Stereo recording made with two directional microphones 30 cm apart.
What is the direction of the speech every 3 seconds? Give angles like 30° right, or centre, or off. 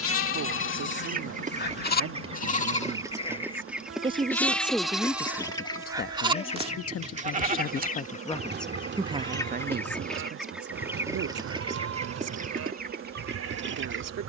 50° right, centre, 30° left, 40° right, 60° right.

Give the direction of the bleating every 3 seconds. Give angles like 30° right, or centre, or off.
40° left, centre, 30° right, 40° right, 50° right.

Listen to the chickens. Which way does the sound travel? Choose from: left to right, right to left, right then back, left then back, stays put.
left then back.